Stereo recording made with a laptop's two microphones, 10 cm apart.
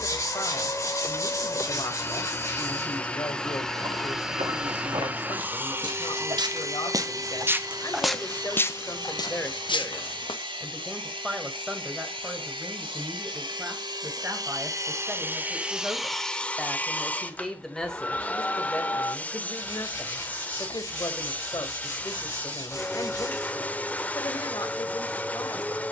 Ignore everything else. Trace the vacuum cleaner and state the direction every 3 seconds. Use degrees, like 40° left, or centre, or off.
20° left, 10° right, 40° right, 60° right, 60° right, centre, 10° left, 10° left, 10° left.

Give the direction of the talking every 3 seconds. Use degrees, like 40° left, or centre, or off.
50° left, 50° left, 40° left, centre, 20° right, 10° right, 30° left, 40° left, 40° left.